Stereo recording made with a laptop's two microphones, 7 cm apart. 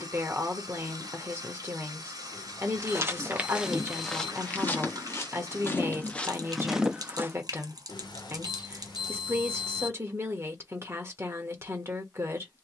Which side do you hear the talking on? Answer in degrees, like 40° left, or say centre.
30° right.